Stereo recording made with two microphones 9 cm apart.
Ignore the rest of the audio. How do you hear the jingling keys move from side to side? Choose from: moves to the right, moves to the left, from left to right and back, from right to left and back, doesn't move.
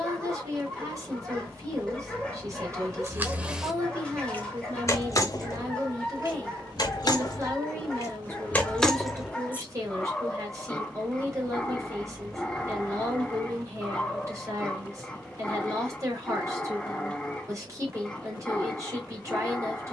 from right to left and back.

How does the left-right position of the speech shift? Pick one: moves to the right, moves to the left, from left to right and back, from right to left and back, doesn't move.
doesn't move.